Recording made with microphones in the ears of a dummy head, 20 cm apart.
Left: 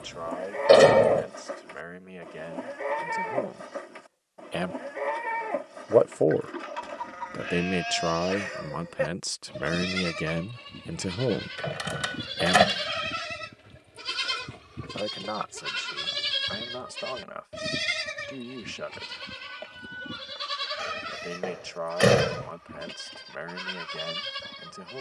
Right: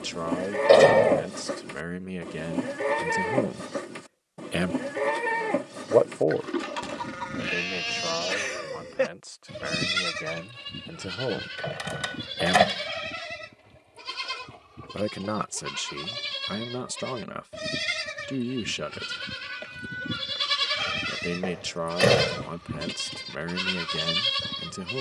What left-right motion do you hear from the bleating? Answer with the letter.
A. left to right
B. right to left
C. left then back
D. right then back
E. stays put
C.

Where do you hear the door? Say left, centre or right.
centre.